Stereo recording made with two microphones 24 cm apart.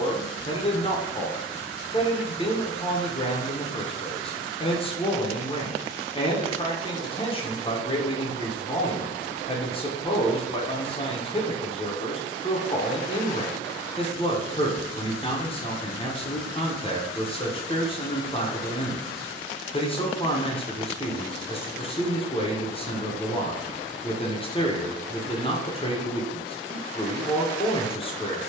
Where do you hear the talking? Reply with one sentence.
In this clip you hear the talking on the left.